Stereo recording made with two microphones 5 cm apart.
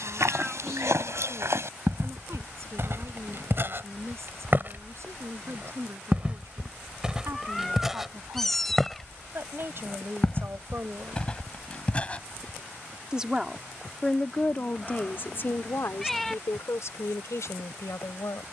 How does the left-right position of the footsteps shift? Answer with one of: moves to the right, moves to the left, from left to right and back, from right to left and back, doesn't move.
moves to the left.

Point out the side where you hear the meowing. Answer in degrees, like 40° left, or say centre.
10° left.